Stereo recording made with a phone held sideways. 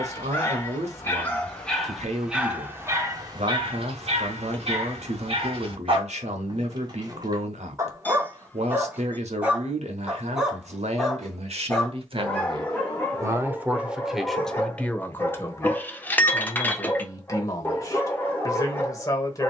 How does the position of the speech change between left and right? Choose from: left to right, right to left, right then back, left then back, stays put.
right to left.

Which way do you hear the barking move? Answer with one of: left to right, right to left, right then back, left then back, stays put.
right then back.